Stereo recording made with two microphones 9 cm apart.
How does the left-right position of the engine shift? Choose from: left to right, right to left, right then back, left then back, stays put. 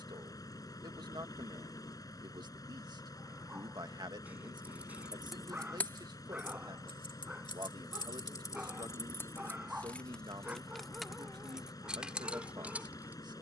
stays put.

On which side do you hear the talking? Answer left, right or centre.
right.